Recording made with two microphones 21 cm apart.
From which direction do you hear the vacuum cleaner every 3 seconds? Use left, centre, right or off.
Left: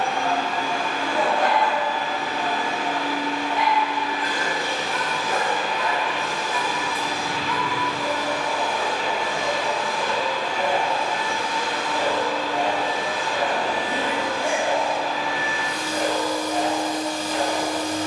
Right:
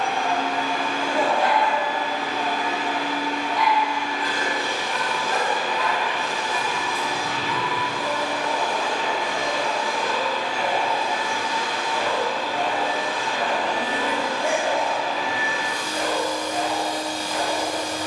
left, left, left, centre, centre, left.